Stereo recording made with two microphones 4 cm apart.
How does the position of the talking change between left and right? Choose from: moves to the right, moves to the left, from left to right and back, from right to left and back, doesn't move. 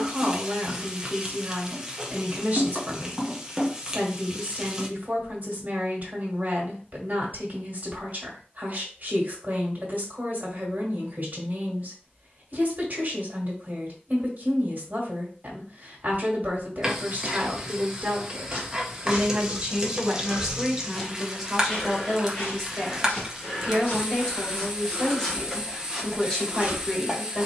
moves to the left.